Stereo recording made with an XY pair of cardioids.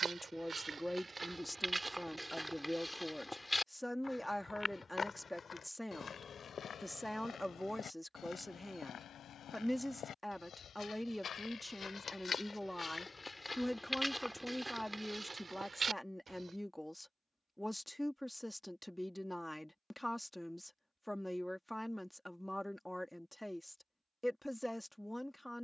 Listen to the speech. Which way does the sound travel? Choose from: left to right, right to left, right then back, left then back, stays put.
stays put.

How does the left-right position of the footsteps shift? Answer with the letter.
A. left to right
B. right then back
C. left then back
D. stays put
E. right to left
C.